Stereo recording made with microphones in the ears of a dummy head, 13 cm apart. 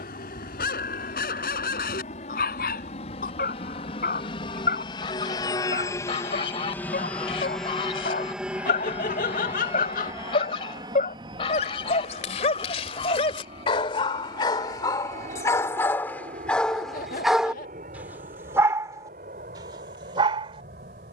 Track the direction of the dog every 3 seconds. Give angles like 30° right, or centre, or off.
80° left, 70° left, 70° left, 60° left, 40° left, 10° left, 30° right.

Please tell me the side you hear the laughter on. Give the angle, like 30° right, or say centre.
70° left.